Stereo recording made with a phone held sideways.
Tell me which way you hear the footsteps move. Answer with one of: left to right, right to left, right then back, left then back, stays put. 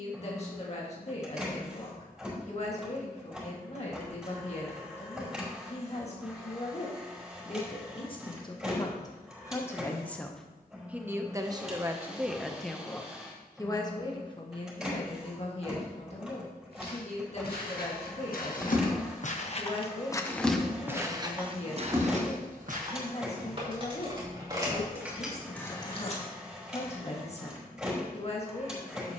left to right.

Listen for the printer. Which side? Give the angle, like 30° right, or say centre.
centre.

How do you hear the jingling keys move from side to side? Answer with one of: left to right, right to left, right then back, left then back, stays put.
right then back.